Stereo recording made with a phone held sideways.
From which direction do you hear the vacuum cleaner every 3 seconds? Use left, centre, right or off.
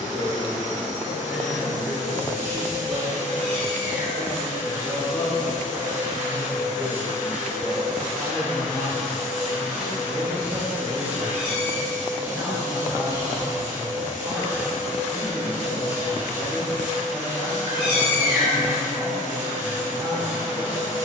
right, right, centre, centre, right, right, right.